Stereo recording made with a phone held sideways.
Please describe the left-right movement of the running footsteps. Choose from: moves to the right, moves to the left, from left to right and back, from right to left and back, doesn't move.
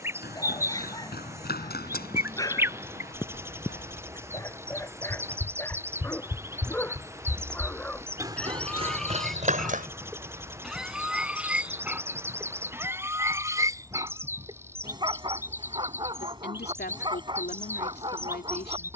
moves to the right.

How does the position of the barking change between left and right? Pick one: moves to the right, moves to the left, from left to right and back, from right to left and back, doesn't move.
moves to the right.